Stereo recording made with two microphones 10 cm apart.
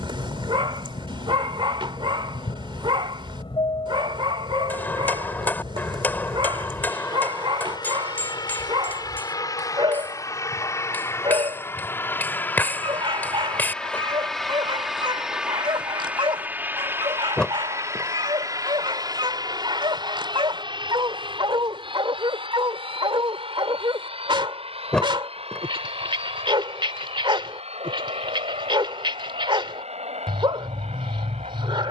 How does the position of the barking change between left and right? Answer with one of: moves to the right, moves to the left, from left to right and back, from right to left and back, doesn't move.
doesn't move.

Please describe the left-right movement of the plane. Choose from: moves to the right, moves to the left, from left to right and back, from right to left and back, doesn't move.
moves to the right.